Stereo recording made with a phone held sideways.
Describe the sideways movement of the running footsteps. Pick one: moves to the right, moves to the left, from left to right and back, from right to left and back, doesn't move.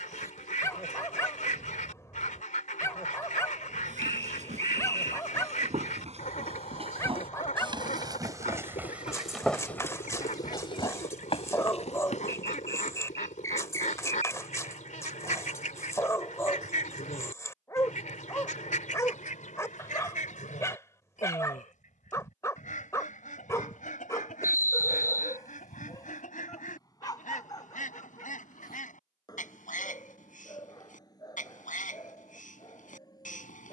moves to the left.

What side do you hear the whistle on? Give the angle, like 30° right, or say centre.
20° left.